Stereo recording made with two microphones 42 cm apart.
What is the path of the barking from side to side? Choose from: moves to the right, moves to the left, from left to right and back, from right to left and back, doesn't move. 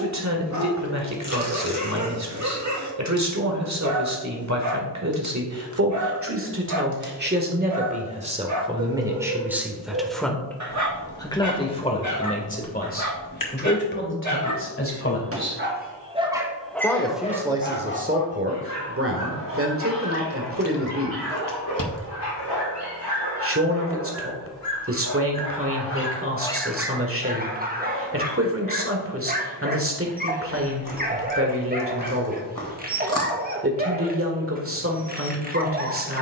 from right to left and back.